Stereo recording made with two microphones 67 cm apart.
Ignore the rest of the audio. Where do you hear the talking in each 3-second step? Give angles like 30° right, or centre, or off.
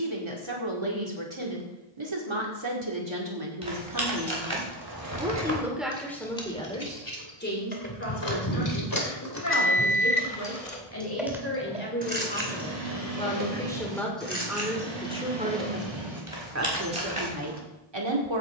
40° right, 20° right, 10° left, 20° left, 10° left, 20° right.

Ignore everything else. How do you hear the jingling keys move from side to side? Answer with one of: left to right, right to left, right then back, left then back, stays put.
left then back.